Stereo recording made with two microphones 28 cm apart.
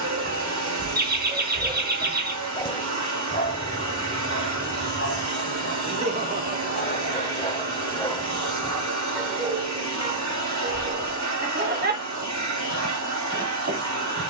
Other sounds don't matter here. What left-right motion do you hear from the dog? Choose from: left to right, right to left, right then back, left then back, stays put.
left then back.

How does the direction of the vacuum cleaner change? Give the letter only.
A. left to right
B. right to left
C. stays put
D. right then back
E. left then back
C.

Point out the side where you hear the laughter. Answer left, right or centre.
right.